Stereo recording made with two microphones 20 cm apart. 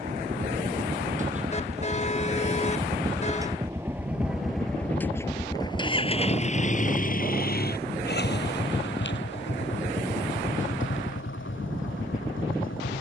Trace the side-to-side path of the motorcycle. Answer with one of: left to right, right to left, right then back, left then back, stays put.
right to left.